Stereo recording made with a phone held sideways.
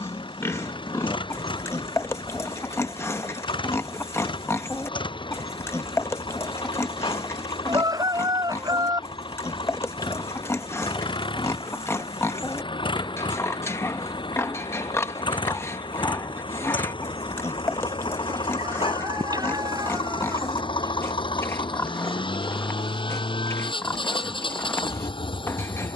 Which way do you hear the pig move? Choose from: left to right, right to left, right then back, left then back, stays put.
stays put.